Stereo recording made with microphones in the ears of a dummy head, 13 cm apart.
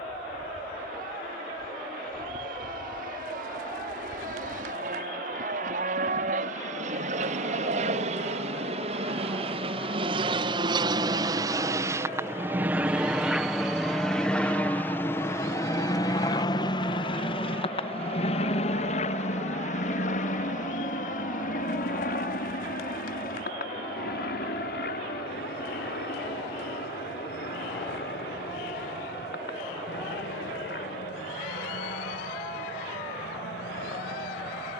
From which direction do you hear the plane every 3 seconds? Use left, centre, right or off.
right, right, right, right, centre, left, left, left, left, left, left, left.